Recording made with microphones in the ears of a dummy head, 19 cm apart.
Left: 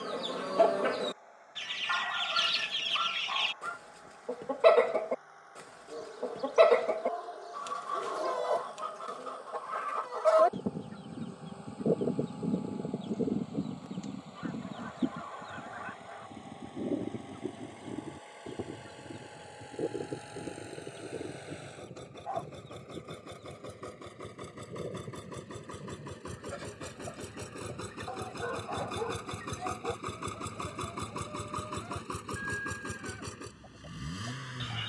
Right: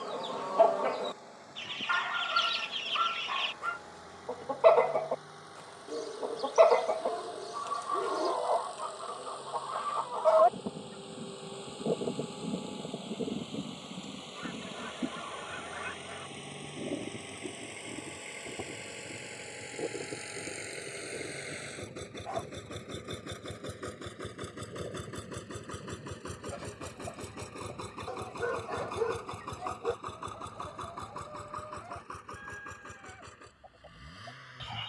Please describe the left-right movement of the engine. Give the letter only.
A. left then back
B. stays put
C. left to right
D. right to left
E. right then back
D.